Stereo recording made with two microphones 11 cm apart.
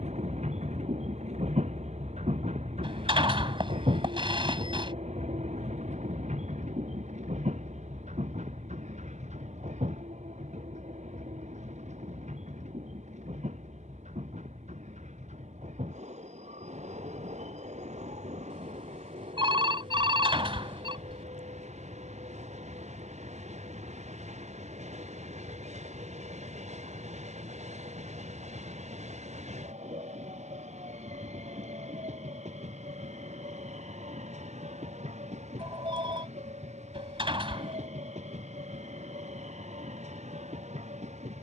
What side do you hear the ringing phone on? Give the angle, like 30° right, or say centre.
50° right.